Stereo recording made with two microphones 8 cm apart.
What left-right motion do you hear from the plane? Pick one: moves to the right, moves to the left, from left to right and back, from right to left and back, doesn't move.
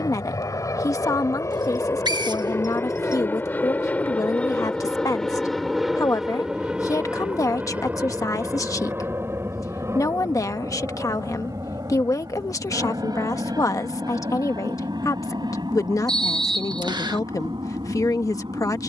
moves to the right.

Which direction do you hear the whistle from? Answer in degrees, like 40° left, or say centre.
70° right.